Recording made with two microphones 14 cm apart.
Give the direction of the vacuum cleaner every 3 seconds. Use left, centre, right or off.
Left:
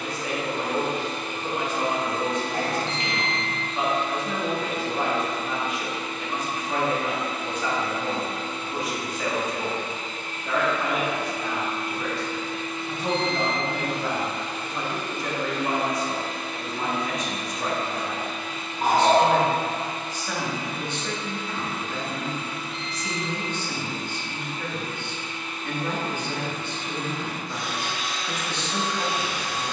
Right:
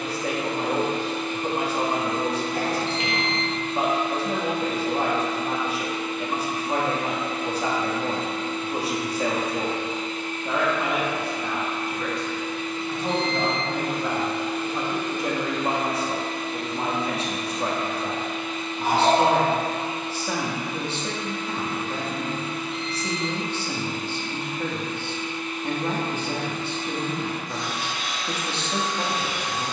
left, left, left, left, centre, right, right, right, right, right.